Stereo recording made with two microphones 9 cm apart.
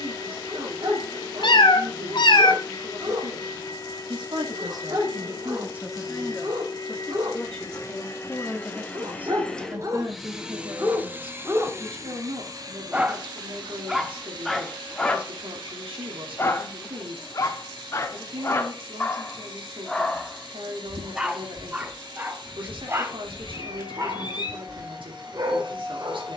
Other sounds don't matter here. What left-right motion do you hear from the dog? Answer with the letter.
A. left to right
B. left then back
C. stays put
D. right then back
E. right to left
B.